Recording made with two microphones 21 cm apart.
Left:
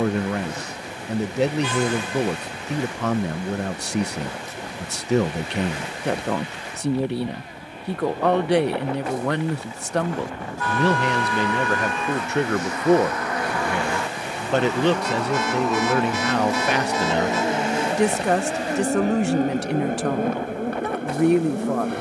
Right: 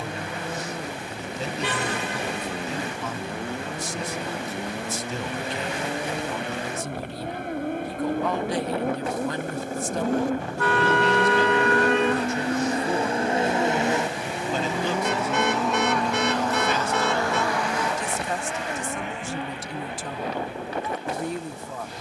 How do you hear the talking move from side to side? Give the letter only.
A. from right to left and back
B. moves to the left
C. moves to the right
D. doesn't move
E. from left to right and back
D.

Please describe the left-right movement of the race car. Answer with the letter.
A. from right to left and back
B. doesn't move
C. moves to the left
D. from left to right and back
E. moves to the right
C.